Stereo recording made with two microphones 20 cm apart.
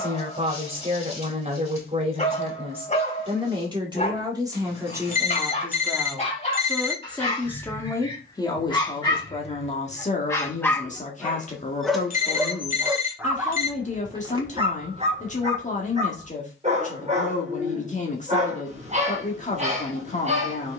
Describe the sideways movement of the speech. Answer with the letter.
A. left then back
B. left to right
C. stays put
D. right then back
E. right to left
E.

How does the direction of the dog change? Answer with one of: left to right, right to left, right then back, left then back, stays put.
left to right.